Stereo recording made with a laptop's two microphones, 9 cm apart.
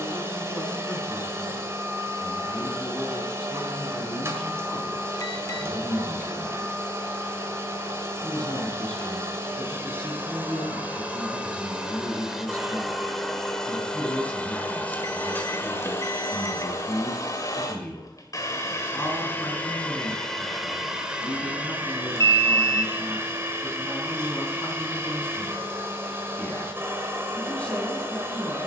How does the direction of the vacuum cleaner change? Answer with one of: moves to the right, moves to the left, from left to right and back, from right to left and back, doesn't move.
from right to left and back.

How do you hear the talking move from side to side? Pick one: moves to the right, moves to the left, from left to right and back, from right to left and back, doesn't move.
doesn't move.